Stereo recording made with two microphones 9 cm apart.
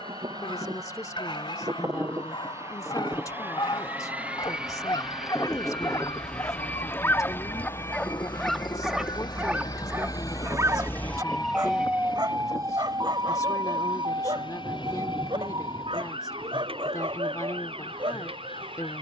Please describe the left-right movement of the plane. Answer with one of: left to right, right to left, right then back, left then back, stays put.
right to left.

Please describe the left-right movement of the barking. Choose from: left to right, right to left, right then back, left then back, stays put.
left to right.